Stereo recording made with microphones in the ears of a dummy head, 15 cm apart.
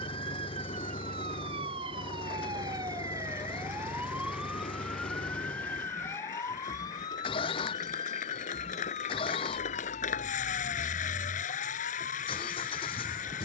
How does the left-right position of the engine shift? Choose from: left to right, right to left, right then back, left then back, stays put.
stays put.